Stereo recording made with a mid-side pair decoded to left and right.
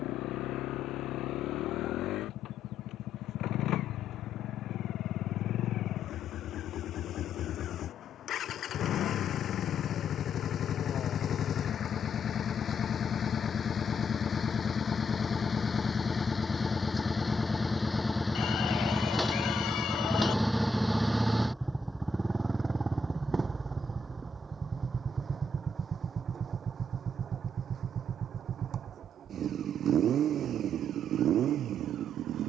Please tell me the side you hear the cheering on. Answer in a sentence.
You can hear the cheering on the left.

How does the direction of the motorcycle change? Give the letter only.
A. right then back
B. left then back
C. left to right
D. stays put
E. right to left
C.